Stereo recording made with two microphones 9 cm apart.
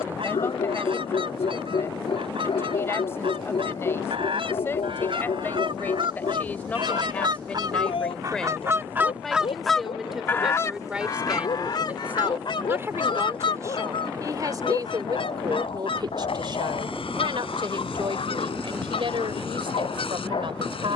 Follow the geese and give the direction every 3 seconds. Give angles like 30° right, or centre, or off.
70° right, 70° right, 50° right, 30° left, 70° left, 80° left, 80° left.